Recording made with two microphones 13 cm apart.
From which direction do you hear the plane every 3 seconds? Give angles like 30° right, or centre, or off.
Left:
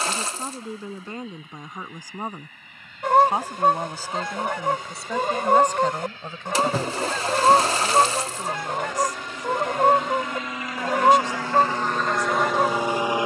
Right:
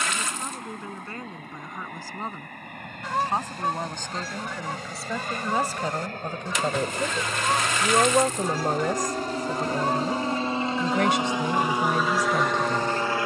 60° right, 60° right, 50° right, 30° right, 10° left.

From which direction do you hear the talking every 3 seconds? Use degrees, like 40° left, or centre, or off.
20° left, centre, 30° right, 70° right, 80° right.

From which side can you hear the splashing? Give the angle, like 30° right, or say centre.
30° left.